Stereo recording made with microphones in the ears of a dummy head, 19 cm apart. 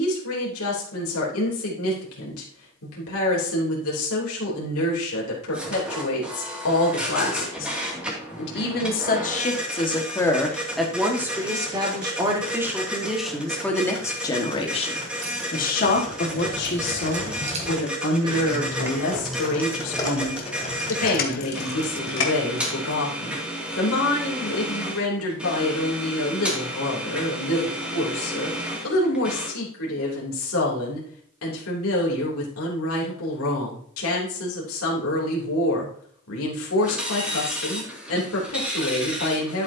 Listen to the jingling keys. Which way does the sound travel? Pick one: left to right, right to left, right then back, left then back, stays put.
right to left.